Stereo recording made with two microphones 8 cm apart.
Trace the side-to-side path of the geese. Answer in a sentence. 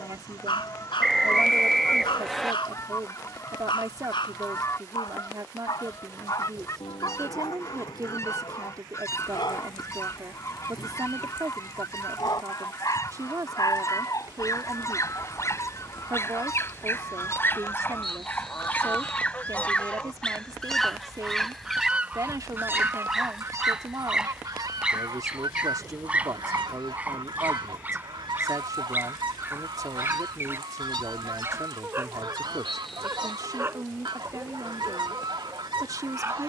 In this clip you hear the geese move to the right.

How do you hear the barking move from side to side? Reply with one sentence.
In this clip you hear the barking move to the right.